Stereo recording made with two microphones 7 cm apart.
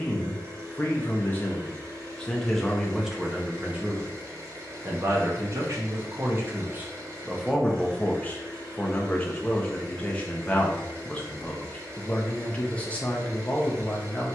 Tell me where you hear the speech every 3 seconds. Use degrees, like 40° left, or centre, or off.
20° left, 30° right, centre, 20° left, 20° left.